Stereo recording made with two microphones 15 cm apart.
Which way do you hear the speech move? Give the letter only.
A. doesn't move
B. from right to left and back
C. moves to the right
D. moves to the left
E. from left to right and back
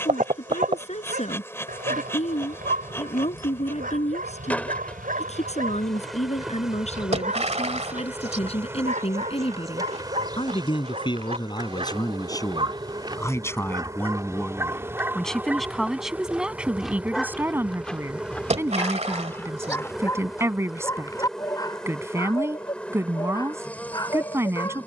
C.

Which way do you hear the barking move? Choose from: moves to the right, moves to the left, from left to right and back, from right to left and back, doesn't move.
moves to the left.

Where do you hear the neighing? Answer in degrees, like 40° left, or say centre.
50° right.